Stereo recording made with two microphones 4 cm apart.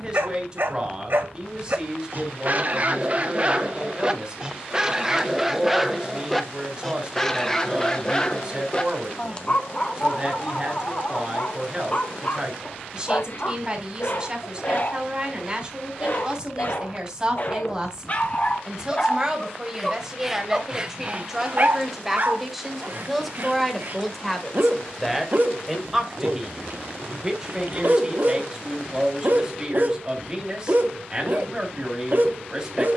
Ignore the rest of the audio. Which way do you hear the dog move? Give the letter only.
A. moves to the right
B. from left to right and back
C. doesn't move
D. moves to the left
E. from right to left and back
E.